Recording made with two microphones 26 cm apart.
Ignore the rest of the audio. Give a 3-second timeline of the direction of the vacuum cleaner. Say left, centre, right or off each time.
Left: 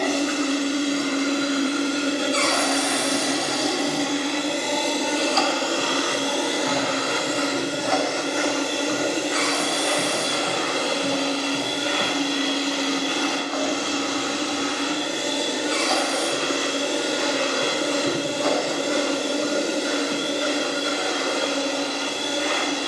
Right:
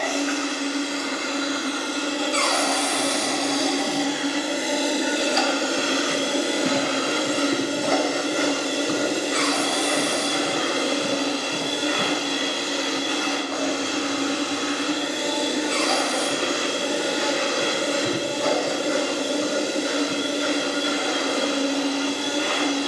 left, centre, right, right, right, right, right, right.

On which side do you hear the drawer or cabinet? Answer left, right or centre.
centre.